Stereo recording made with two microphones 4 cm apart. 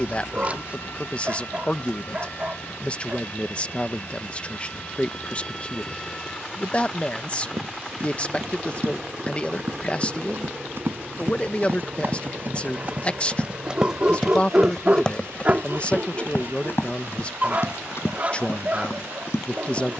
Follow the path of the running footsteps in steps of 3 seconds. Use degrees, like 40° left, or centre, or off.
off, off, 60° right, 50° right, 20° right, 50° left, 70° left.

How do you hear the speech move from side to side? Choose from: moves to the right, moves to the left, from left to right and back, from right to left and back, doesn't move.
doesn't move.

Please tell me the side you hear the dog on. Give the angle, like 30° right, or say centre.
40° right.